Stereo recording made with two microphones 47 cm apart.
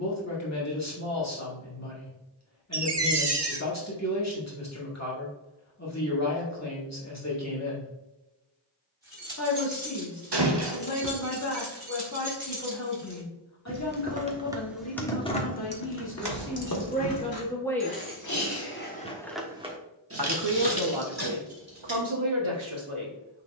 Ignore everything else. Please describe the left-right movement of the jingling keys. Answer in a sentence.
You can hear the jingling keys move from right to left and back again.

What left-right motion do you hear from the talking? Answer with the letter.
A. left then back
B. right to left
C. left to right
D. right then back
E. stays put
C.